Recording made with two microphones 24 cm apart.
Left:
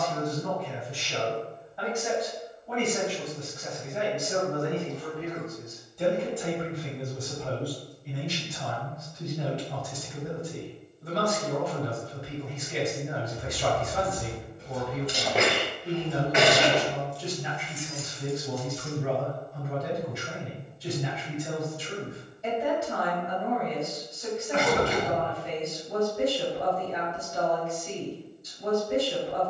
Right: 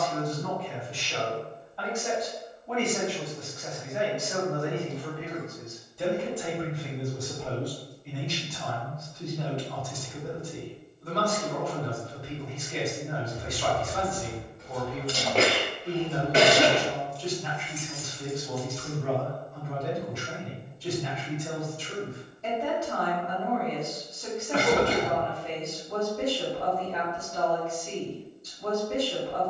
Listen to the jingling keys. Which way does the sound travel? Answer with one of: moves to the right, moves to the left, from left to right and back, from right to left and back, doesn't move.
from left to right and back.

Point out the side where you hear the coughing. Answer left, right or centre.
right.